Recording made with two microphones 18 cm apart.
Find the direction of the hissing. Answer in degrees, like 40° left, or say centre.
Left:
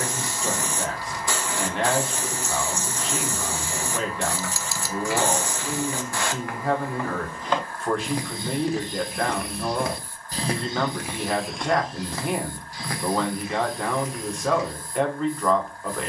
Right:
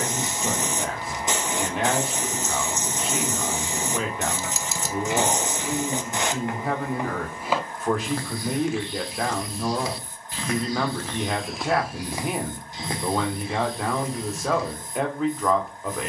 20° right.